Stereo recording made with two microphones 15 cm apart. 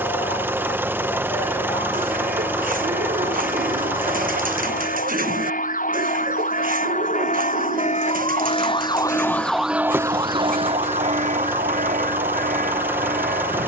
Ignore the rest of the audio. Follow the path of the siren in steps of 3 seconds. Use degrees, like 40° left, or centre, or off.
80° left, 80° left, 60° left, 30° right, 70° right.